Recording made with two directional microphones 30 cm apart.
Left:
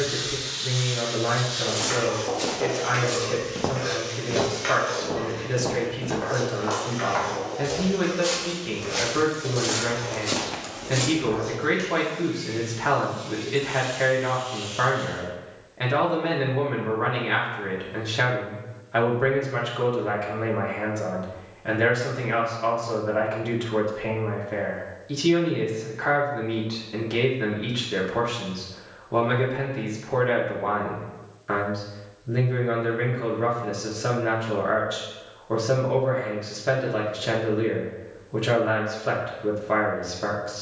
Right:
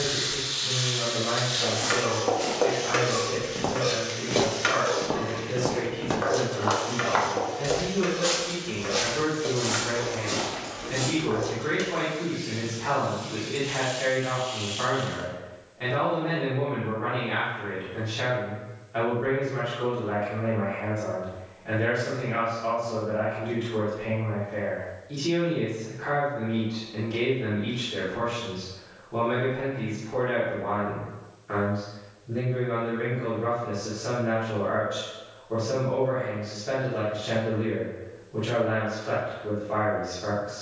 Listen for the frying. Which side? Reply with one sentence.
You can hear the frying on the right.